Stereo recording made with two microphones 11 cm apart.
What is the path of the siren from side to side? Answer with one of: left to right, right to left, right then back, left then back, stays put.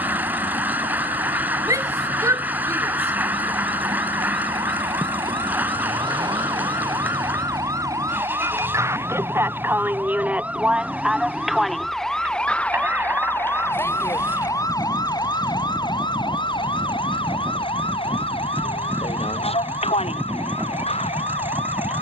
right to left.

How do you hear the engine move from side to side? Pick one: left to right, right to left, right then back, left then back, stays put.
stays put.